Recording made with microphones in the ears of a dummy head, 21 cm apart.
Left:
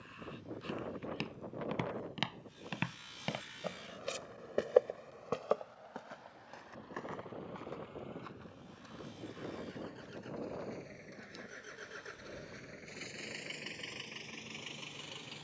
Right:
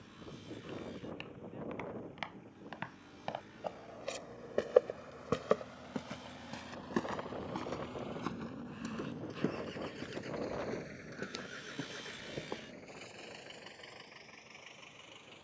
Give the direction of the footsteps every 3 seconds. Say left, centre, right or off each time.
left, centre, right, right, right.